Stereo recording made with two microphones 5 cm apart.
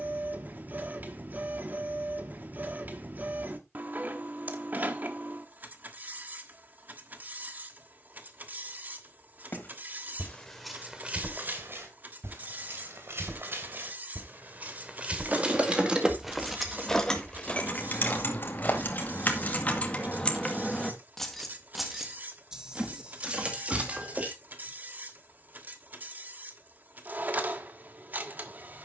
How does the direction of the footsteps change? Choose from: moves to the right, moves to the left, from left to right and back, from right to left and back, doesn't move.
from left to right and back.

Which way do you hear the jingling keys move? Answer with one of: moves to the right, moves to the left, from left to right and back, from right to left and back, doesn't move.
from right to left and back.